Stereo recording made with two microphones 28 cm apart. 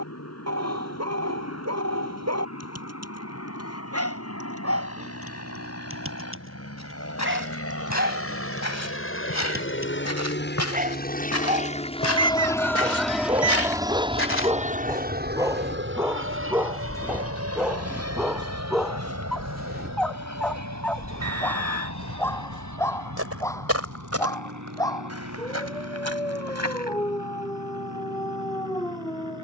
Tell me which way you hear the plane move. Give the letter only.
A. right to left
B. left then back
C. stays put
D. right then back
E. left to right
E.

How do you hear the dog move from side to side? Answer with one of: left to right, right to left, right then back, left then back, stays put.
right to left.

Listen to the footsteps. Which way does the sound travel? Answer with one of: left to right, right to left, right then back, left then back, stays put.
left to right.